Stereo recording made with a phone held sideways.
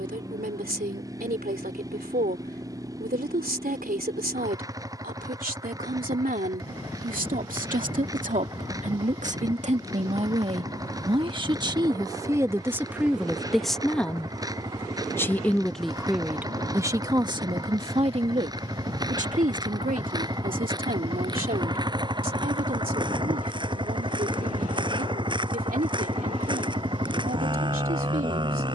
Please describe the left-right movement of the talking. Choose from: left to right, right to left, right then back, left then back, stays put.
left then back.